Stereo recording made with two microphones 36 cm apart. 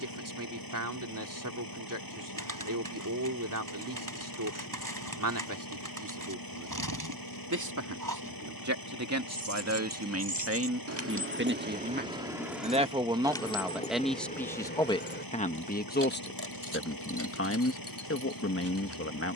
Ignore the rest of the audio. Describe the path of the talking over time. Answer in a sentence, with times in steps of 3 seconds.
You can hear the talking on the right from 0 s, in the centre from 12 s and on the left from 15 s.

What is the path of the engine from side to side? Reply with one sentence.
You can hear the engine stay put.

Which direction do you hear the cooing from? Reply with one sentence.
You can hear the cooing on the right.